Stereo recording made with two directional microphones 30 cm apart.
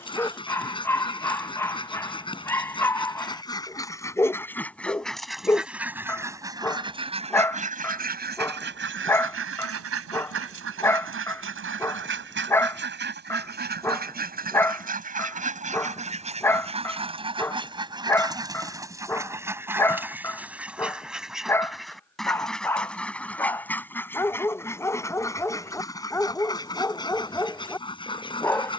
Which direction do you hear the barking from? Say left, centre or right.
centre.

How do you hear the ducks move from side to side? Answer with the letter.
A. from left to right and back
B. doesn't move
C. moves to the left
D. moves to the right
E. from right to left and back
A.